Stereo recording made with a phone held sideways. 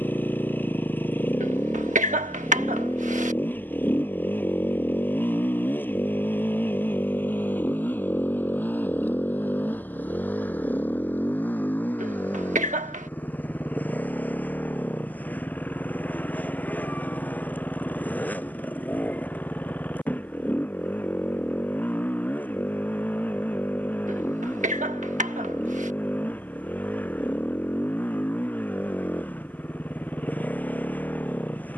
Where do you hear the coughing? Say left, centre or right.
right.